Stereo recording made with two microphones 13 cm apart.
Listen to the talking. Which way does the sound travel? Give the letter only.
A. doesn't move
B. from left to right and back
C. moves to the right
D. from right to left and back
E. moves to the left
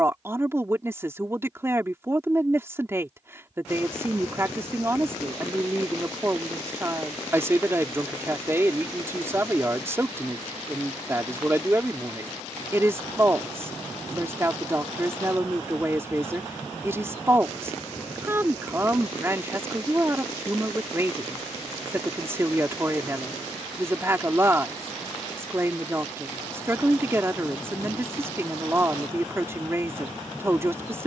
A.